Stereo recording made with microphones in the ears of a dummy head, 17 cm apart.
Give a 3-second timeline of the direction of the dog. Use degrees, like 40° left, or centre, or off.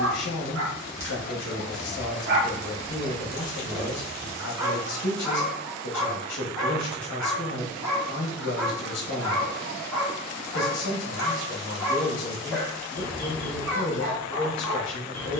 60° right, 10° right, 10° left, 10° left, 10° left.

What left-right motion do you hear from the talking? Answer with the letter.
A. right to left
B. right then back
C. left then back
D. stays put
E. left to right
D.